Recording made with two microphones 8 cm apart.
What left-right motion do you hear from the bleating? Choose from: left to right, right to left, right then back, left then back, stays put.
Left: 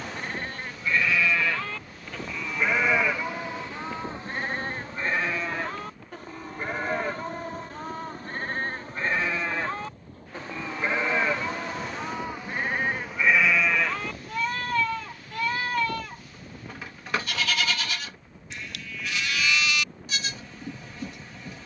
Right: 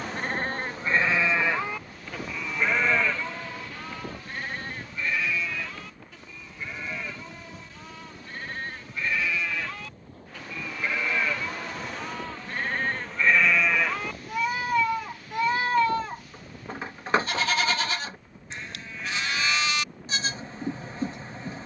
left then back.